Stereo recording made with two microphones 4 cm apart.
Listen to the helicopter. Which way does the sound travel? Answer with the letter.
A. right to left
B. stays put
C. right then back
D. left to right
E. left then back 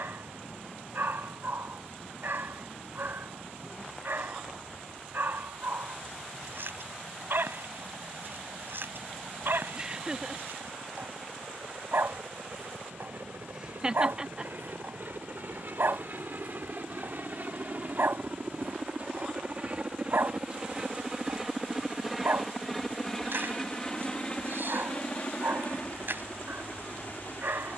A.